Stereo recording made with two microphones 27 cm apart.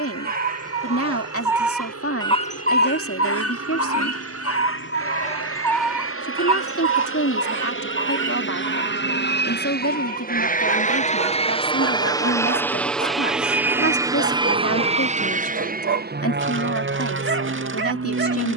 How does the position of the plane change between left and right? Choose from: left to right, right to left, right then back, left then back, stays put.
left to right.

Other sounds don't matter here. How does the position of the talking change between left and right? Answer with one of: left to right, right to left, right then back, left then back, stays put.
stays put.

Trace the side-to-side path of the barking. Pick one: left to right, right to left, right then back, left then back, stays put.
left then back.